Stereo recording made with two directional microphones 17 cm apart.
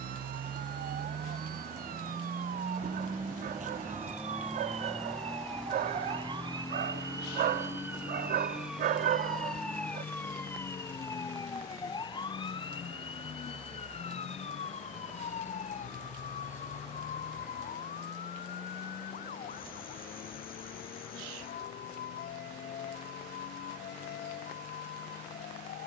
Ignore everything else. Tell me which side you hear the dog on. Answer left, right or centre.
right.